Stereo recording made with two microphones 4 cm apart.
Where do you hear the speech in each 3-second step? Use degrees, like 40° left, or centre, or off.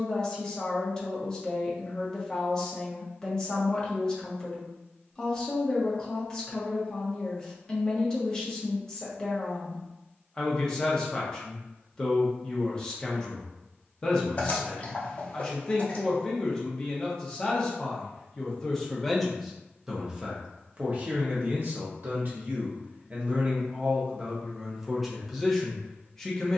20° left, 20° left, 20° left, 20° left, 20° left, 20° left, centre, 40° right, centre.